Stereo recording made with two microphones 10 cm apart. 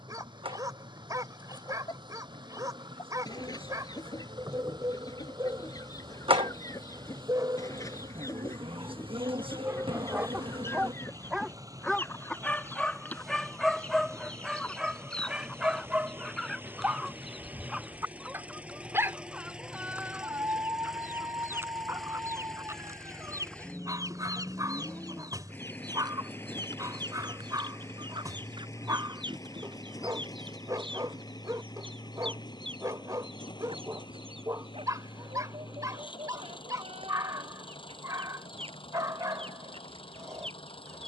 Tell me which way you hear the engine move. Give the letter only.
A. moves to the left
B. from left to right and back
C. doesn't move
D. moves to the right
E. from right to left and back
A.